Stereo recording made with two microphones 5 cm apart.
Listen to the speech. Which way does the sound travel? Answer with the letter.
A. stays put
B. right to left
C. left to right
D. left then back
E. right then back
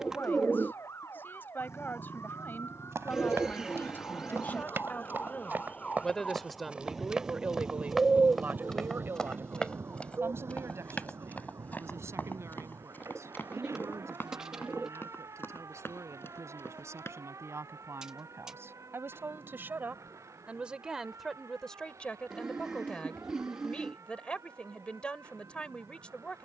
E.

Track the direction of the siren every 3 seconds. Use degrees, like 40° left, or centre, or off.
70° left, 50° left, 10° right, 60° right, 70° right, 80° right, 80° right, 80° right, 80° right.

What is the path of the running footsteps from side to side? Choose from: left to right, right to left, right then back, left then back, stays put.
right to left.